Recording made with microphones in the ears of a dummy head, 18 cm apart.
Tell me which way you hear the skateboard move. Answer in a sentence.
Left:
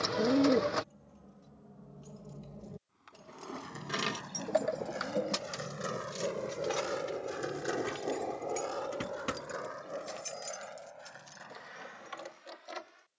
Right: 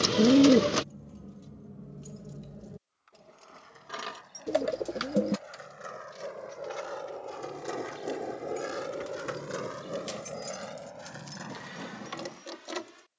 In this clip you hear the skateboard move from left to right.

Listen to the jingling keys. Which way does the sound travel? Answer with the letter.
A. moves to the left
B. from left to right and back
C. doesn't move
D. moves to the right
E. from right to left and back
E.